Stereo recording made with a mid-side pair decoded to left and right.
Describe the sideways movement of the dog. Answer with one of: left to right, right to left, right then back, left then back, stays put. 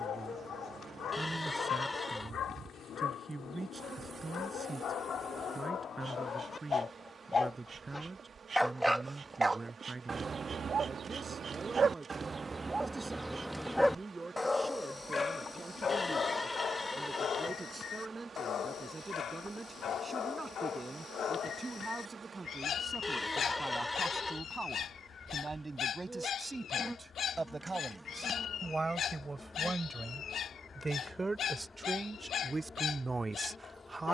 right then back.